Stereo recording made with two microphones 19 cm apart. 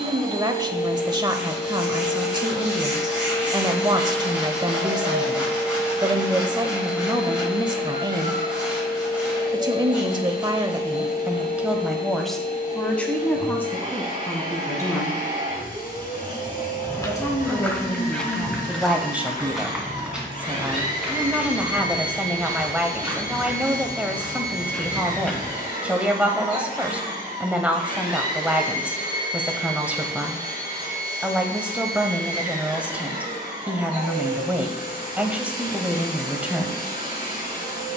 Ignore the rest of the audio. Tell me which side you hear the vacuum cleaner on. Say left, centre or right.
left.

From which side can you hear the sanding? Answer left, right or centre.
centre.